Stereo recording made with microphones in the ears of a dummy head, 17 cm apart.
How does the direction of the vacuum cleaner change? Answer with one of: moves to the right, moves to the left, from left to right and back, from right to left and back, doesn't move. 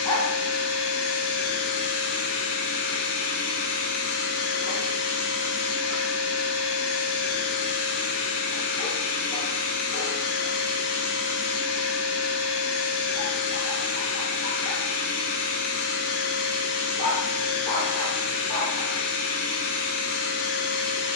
doesn't move.